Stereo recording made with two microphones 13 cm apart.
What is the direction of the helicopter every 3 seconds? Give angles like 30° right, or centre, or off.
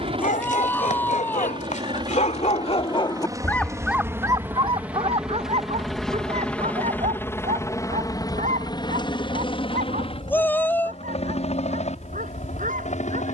40° right, 10° right, 20° left, 50° left, 60° left.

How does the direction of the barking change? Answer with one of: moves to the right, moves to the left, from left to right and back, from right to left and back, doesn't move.
moves to the right.